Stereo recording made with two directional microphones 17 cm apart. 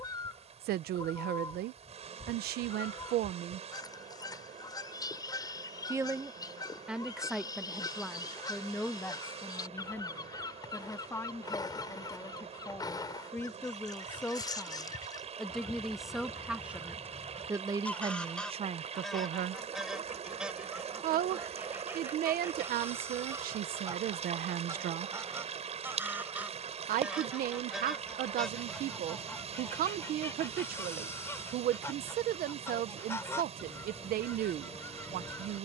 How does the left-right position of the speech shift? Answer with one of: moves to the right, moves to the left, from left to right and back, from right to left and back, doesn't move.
from right to left and back.